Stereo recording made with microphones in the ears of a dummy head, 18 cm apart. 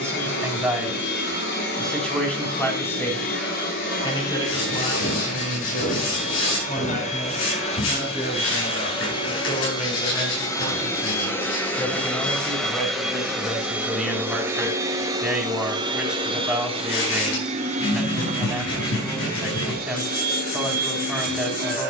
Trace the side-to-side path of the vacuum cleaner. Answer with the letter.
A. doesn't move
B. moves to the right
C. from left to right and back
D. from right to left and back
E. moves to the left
B.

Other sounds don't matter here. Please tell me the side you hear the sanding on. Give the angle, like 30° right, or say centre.
60° left.